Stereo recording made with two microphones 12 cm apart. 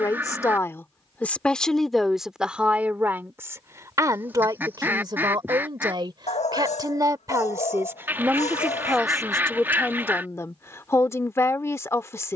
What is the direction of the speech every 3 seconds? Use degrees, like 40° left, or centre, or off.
10° left, 30° right, 20° right, 20° left.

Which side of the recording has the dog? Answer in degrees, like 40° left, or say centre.
70° left.